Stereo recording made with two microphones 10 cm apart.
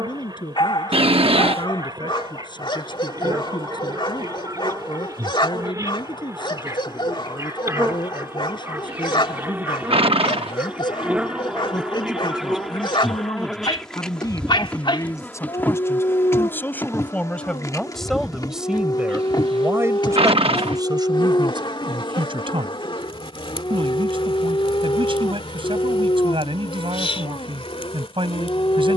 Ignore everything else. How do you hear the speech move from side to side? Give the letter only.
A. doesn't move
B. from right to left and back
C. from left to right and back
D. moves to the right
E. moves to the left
D.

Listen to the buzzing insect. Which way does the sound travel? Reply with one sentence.
In this clip you hear the buzzing insect go from the right side to the left.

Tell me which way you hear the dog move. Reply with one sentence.
You can hear the dog stay in one place.